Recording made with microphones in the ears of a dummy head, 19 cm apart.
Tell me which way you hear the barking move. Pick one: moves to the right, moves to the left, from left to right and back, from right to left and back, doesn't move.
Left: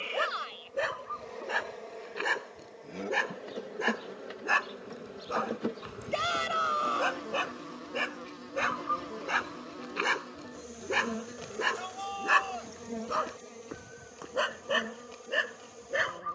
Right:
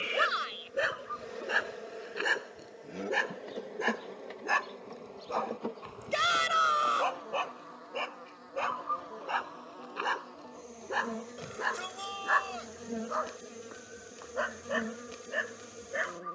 moves to the left.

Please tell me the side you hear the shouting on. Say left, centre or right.
right.